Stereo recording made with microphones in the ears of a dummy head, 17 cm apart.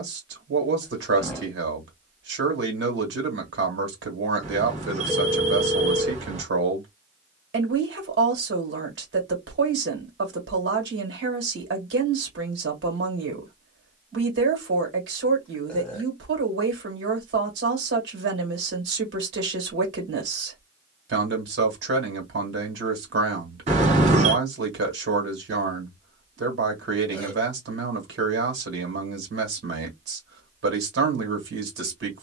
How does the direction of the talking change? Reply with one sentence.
In this clip you hear the talking stay in one place.